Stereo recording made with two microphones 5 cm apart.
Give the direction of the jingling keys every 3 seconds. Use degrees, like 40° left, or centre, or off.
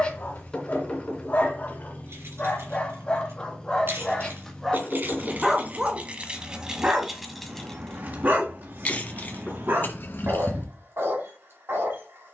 70° right, 50° right, centre, 50° left.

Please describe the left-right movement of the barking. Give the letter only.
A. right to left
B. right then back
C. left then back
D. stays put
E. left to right
E.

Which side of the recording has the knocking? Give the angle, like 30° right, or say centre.
20° left.